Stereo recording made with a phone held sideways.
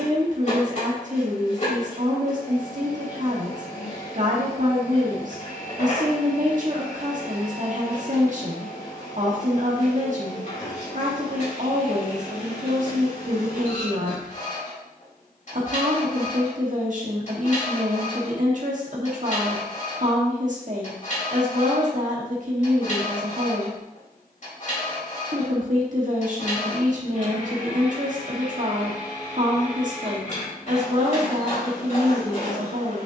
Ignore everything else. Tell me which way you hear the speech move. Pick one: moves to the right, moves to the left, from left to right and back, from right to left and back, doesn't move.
doesn't move.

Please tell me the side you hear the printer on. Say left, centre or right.
left.